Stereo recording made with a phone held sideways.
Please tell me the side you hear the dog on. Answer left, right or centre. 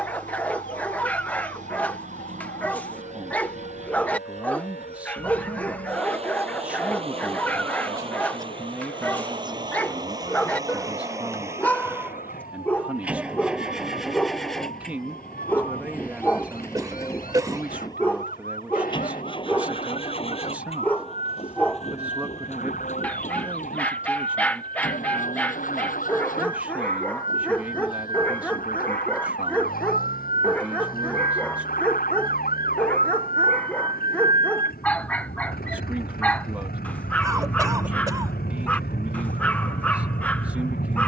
centre.